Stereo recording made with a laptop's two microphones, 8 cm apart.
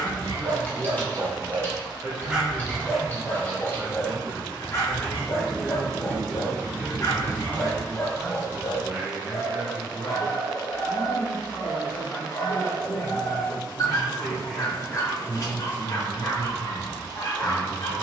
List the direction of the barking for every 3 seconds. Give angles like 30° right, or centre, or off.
20° right, 30° left, 40° left, 40° left, 40° left, 40° left.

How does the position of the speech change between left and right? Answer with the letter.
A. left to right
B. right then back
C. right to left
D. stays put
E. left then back
E.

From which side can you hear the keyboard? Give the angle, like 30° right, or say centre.
20° left.